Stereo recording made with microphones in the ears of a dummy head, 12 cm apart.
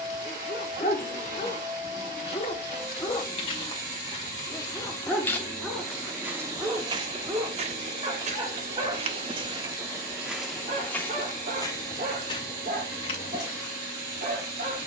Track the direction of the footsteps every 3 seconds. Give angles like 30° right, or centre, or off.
50° left, 30° left, 40° right, centre, 40° left.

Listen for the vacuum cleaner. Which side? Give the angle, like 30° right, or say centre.
30° right.